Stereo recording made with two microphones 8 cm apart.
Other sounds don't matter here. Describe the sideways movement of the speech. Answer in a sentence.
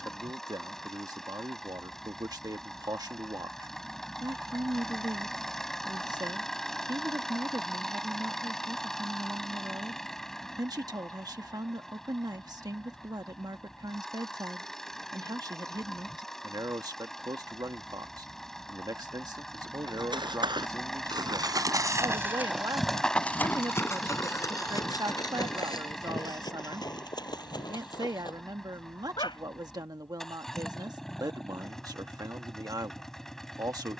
You can hear the speech stay put.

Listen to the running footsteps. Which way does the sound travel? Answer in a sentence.
You can hear the running footsteps move from right to left.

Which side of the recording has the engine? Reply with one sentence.
You can hear the engine in the centre.